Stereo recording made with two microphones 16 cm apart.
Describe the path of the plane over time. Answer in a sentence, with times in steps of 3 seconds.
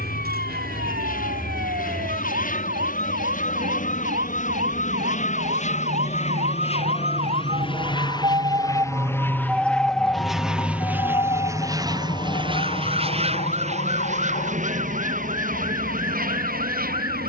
You can hear the plane on the left from 0 s, in the centre from 9 s and on the right from 12 s.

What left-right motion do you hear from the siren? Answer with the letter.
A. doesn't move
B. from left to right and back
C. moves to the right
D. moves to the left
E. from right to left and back
D.